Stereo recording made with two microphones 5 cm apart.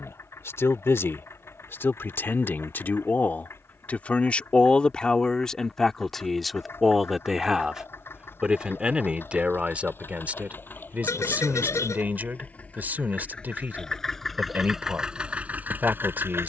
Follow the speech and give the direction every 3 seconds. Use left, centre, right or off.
left, left, centre, right, right, right.